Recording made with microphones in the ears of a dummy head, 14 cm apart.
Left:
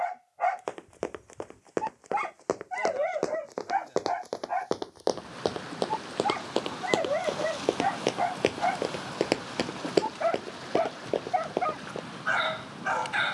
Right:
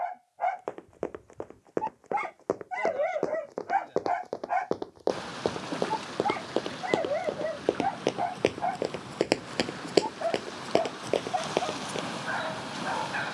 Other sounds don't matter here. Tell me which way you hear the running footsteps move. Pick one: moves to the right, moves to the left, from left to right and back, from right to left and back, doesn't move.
moves to the right.